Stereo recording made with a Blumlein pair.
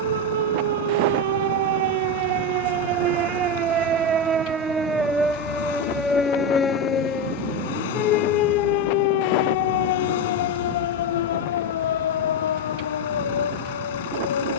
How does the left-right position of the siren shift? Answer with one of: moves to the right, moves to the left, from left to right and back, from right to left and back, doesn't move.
moves to the left.